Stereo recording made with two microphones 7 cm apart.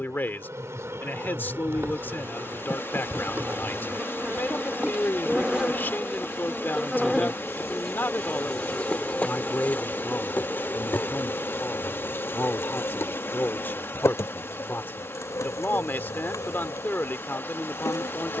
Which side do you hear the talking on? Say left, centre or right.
left.